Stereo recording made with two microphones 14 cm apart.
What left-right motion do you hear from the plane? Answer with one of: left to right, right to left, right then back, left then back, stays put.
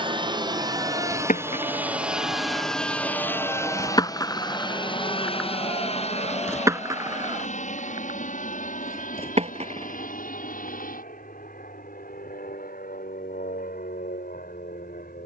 right to left.